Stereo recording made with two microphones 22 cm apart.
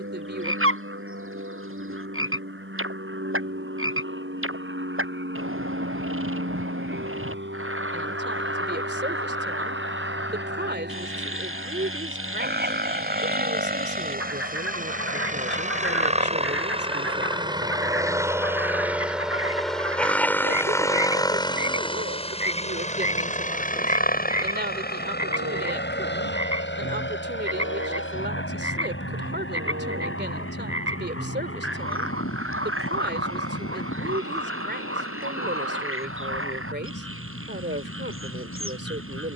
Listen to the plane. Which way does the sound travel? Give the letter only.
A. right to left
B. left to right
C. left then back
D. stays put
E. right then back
A.